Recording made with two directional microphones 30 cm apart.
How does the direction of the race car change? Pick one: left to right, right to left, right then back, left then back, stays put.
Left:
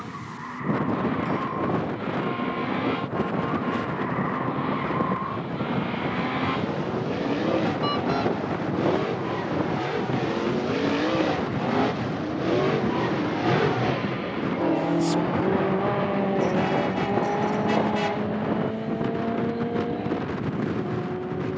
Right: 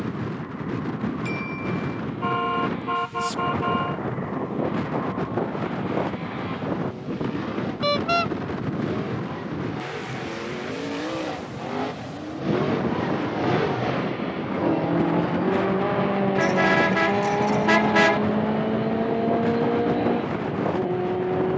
left to right.